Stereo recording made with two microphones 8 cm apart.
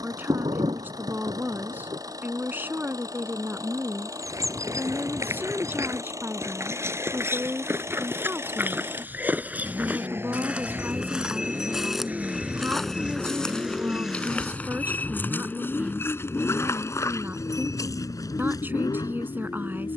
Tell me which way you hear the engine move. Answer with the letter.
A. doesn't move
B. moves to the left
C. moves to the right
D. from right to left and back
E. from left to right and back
B.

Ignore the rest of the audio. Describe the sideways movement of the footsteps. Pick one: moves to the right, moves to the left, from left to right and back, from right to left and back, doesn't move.
moves to the left.